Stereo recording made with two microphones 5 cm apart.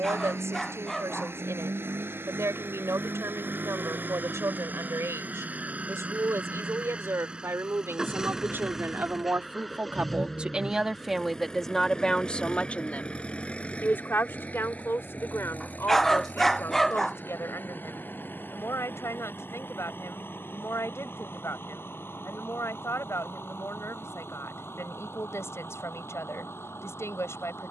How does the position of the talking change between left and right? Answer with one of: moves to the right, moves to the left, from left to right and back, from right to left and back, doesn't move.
moves to the left.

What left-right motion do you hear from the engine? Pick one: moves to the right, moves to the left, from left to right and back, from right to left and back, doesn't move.
moves to the left.